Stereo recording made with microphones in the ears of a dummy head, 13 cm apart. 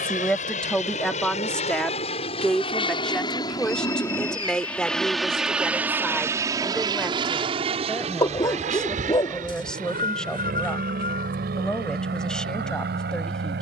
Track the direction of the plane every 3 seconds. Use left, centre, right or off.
left, centre, right, right, right.